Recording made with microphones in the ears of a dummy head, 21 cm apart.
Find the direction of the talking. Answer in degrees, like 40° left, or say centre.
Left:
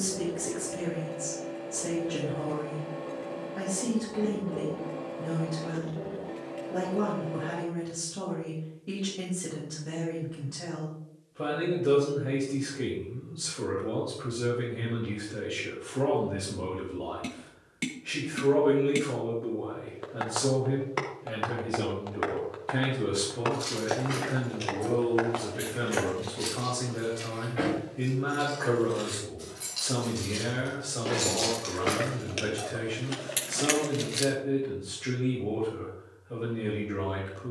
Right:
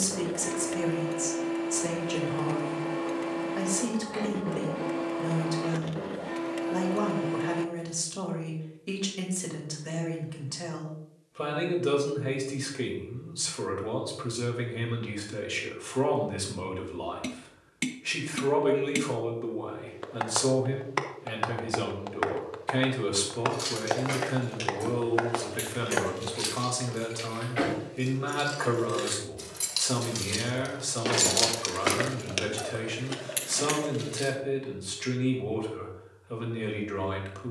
60° right.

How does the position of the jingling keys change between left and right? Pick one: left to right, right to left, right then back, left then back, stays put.
right to left.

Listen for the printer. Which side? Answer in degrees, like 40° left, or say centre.
60° right.